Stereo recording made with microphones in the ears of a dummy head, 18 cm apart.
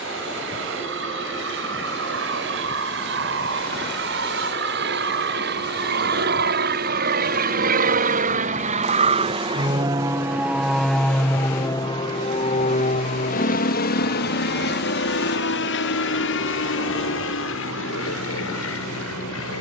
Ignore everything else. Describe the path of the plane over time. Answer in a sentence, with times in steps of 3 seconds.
In this clip you hear the plane on the right from 0 s, in the centre from 9 s and on the left from 12 s.